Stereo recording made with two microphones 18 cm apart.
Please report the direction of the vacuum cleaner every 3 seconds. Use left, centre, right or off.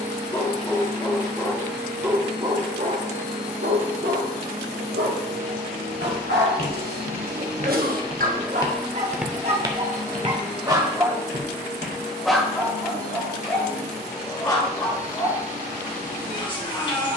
right, right, right, left, left, left.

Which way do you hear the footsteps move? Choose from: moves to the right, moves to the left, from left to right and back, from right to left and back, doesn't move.
moves to the right.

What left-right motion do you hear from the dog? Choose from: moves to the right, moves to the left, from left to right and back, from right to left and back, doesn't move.
from left to right and back.